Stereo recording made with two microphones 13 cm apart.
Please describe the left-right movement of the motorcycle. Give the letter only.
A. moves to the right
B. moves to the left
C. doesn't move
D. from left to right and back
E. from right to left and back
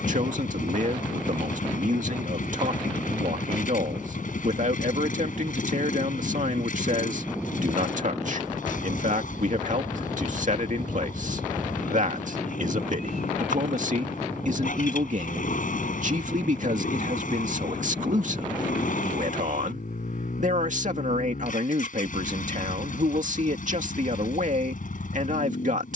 C.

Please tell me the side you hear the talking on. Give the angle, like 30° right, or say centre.
70° right.